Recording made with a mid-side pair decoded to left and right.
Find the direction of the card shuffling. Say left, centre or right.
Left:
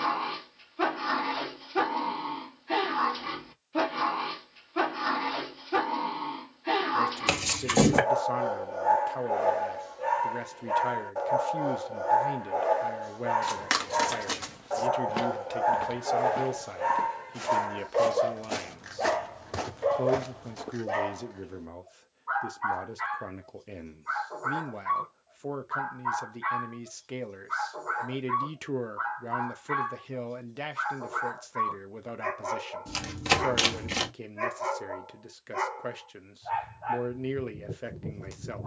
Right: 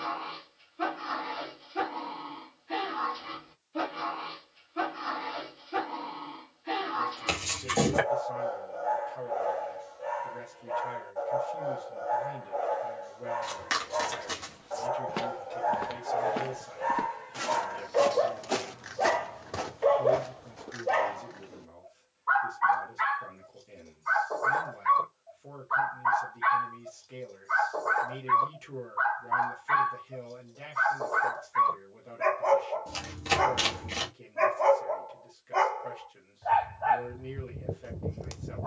left.